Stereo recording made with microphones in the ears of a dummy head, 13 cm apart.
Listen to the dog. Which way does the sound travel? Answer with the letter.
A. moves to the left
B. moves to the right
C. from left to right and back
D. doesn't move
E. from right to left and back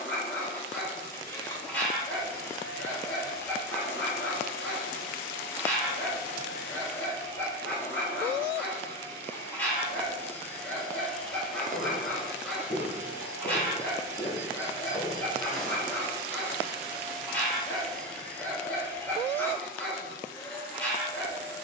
D.